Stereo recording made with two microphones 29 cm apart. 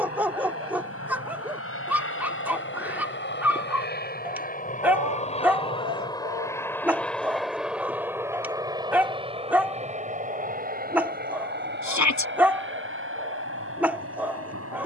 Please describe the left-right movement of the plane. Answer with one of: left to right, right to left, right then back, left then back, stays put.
left to right.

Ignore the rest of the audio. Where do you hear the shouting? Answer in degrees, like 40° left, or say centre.
70° left.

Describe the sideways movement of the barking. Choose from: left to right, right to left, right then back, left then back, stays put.
stays put.